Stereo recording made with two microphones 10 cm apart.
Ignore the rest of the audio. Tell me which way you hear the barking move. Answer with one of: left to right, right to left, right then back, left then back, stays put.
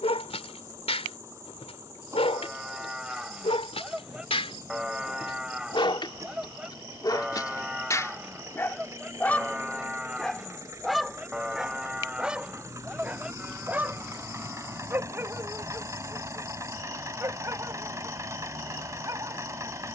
left to right.